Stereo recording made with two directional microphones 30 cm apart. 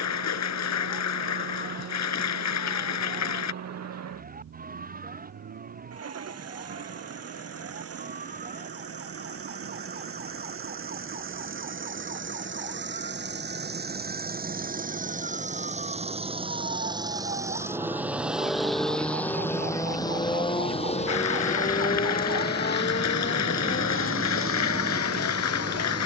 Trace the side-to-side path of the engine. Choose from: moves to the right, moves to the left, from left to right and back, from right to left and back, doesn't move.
moves to the left.